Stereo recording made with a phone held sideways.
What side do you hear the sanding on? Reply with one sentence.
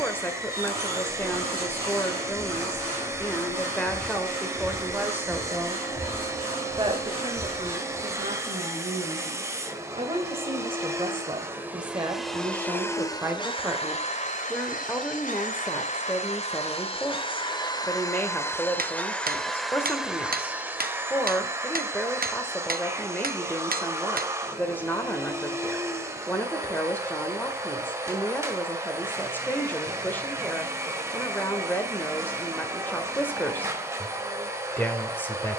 You can hear the sanding on the right.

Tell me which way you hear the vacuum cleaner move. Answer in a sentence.
You can hear the vacuum cleaner move from right to left and back again.